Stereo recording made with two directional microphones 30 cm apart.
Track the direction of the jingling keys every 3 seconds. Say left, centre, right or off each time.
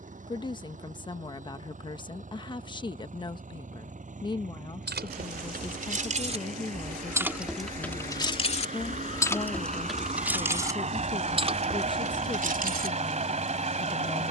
off, right, centre, centre, right.